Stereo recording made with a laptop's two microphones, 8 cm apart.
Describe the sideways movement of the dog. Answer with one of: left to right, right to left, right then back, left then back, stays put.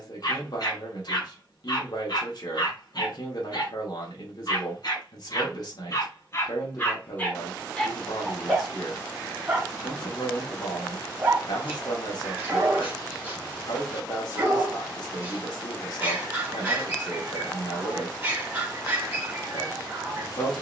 left to right.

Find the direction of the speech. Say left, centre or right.
left.